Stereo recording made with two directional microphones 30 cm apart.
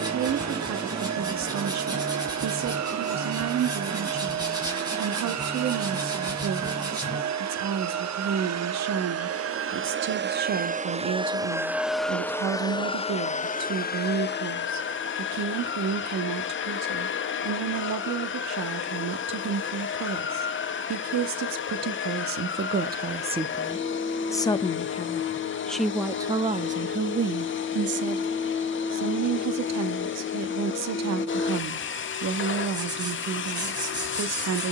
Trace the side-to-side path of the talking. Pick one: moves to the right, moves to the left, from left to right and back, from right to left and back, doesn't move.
from right to left and back.